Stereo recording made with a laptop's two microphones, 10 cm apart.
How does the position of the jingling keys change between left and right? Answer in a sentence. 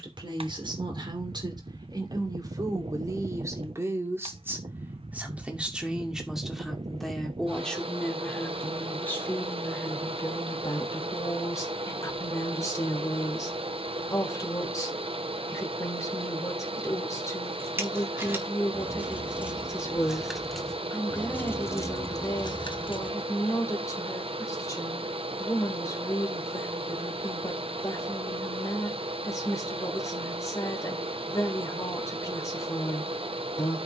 You can hear the jingling keys move from right to left.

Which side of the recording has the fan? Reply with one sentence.
You can hear the fan on the right.